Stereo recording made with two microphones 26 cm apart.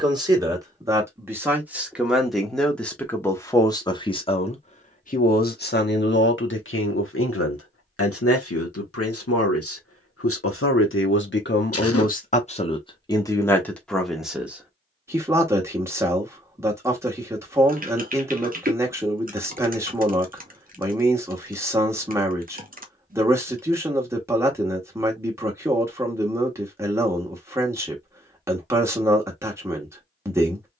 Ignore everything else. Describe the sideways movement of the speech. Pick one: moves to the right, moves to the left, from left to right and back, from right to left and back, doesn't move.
from right to left and back.